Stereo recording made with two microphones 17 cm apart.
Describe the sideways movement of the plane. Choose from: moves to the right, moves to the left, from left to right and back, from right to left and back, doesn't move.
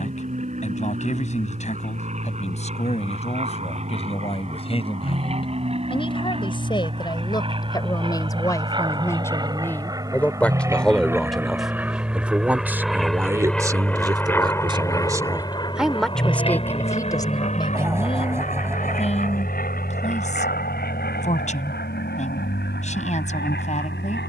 moves to the left.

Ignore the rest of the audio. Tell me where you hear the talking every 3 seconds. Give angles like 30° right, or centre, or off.
50° left, 40° left, 30° left, 10° left, 20° right, 10° left, 40° left, 50° left.